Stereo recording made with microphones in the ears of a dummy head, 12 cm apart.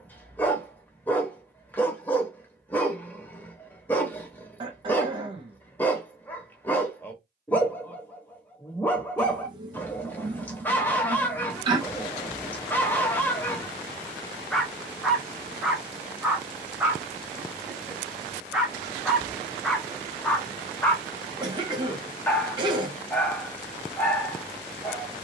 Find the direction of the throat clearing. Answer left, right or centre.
right.